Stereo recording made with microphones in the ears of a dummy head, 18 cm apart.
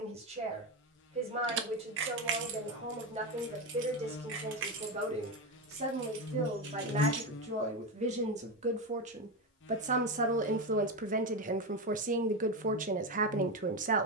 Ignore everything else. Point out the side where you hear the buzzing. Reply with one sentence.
You can hear the buzzing on the left.